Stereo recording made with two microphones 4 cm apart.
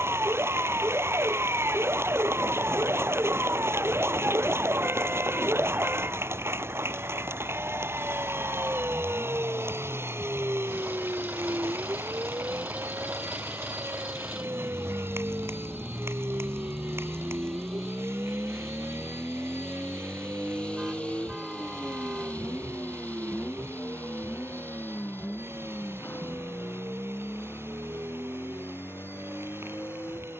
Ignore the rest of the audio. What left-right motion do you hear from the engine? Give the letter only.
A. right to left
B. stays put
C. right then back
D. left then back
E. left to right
A.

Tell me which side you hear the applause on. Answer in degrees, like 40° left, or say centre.
80° right.